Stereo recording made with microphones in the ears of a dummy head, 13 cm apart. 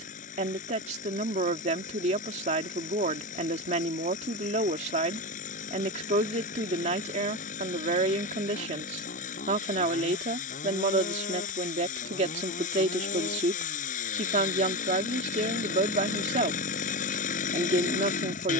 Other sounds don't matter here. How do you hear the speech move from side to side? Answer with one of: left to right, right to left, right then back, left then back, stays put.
stays put.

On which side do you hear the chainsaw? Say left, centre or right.
left.